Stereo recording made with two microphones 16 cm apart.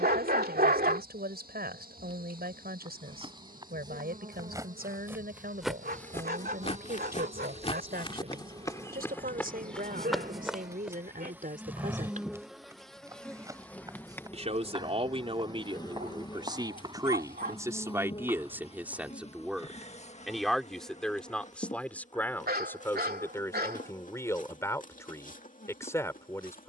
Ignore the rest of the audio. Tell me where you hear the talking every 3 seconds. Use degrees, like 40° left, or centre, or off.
80° right, 80° right, 80° right, 60° right, 50° right, 30° right, 10° right, 10° left, 20° left.